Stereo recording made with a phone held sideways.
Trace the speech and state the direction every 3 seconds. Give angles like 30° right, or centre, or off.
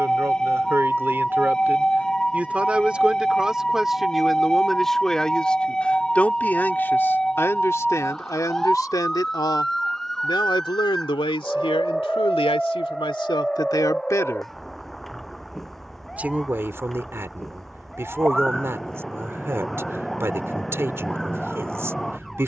20° right, centre, 20° left, 40° left, 40° left, 20° right, 20° right, 20° right.